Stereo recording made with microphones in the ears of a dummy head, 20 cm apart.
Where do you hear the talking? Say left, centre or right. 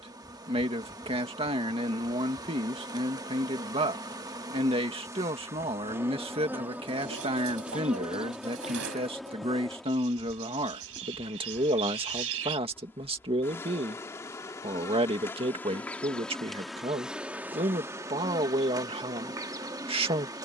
right.